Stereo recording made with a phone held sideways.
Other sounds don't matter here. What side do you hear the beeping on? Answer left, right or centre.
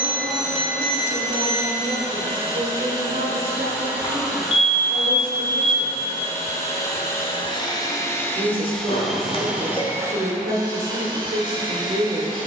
left.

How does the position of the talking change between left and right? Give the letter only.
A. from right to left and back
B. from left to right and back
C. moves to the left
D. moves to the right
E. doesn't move
E.